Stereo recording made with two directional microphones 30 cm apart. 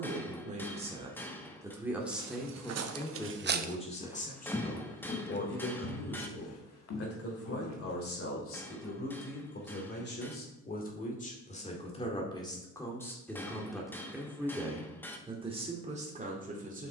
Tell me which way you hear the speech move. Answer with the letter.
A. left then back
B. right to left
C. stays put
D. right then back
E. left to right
A.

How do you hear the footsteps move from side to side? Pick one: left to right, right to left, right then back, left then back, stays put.
right to left.